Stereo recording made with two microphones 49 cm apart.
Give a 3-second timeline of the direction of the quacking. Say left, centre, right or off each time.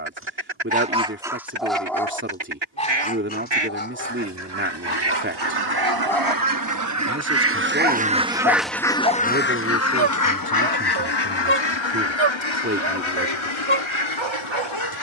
right, right, right, left, left.